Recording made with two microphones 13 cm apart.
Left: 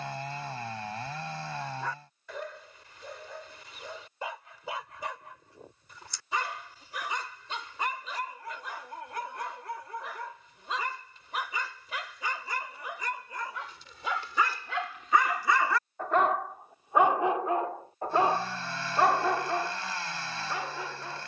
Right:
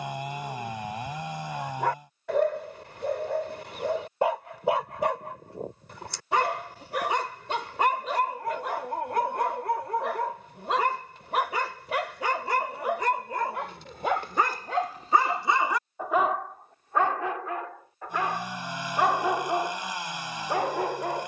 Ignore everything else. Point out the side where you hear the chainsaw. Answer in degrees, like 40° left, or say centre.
20° right.